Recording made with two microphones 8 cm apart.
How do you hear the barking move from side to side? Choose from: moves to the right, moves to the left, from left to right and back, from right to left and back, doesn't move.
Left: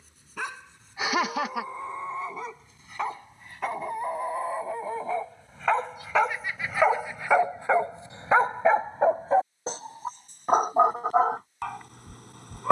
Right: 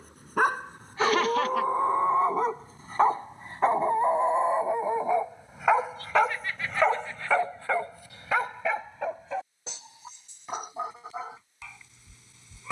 moves to the left.